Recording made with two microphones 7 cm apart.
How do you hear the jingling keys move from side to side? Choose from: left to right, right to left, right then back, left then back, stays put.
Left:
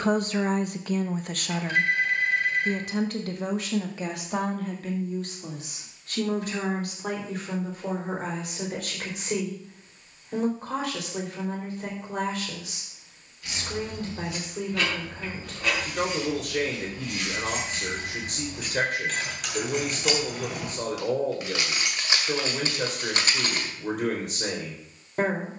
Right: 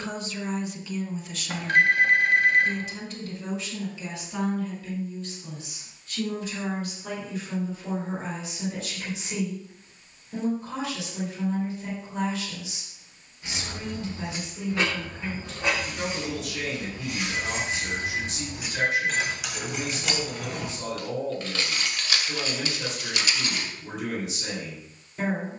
right to left.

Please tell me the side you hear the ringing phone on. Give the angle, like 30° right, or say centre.
60° right.